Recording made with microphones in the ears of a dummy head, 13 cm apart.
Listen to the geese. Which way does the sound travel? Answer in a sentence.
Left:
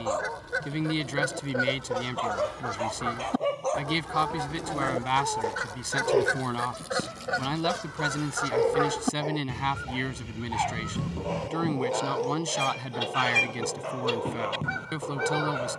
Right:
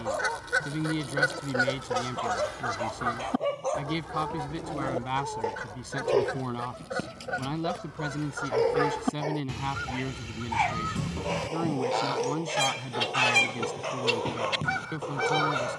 You can hear the geese move from right to left and back again.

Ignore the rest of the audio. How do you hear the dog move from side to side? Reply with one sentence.
You can hear the dog travel towards the right.